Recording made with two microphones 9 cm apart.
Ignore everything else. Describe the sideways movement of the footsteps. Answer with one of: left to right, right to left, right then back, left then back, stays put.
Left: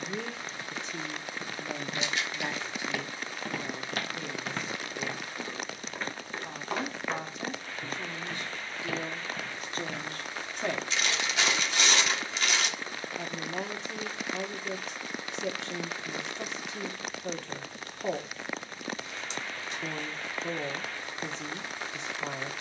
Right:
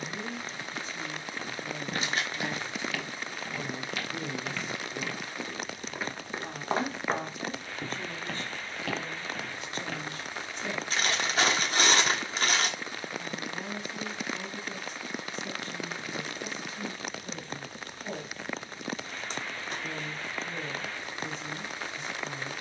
left then back.